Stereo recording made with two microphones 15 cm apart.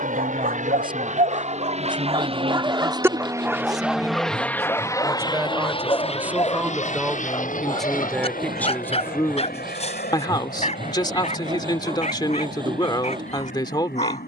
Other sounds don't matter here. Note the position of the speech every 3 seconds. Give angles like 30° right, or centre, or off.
30° right, 20° right, centre, 30° left, 30° left.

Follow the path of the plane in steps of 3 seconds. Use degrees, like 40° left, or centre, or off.
50° right, 10° left, 50° left, 70° left, 70° left.